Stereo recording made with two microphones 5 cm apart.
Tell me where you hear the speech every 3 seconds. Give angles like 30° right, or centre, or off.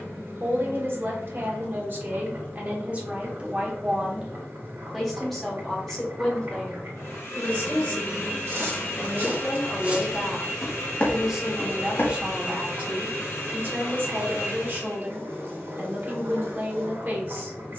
50° right, 10° right, 20° left, 10° left, 40° right, 50° right.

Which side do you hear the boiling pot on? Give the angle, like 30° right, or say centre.
60° right.